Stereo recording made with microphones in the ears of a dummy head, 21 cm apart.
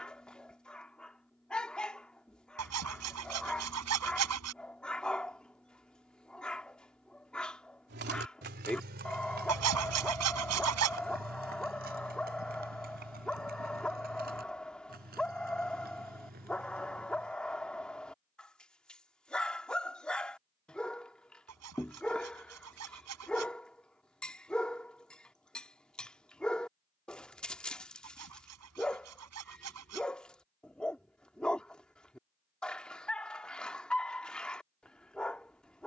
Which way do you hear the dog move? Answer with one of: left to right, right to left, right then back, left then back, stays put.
stays put.